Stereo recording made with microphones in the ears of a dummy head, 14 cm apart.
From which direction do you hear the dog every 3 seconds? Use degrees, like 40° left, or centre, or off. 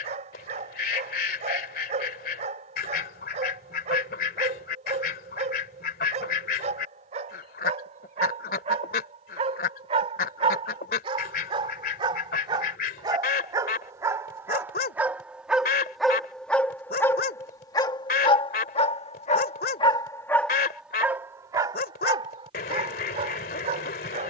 40° right, 40° right, 40° right, 30° right, 20° right, 10° left, 30° left, 30° right.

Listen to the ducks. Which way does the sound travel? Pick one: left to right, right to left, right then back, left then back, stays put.
stays put.